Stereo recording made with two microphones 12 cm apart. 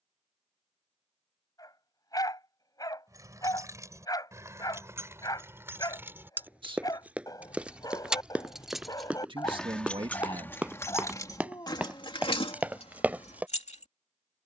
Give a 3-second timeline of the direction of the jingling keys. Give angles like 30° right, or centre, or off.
off, 20° right, 10° right, 20° left, 50° left.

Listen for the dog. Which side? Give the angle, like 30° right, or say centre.
30° left.